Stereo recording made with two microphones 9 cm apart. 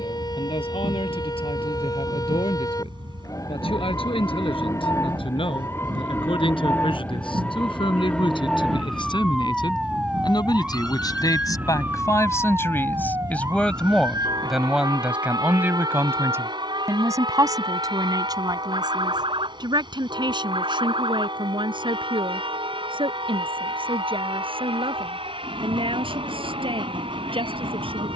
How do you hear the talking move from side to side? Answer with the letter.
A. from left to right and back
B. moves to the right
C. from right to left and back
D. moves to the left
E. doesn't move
B.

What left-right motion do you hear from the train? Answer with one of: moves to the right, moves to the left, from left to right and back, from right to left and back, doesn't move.
doesn't move.